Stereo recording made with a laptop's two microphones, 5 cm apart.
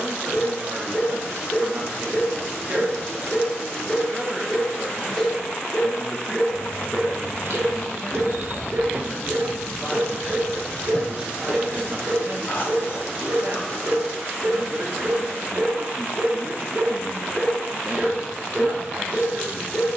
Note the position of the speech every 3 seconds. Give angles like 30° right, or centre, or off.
50° right, centre, 30° left, 10° right, 40° right, 40° right, 40° right.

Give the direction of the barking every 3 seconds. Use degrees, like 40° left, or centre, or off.
20° left, 20° left, 10° right, 60° right, 70° right, 30° right, 20° left.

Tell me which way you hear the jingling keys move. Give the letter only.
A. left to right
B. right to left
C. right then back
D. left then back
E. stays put
B.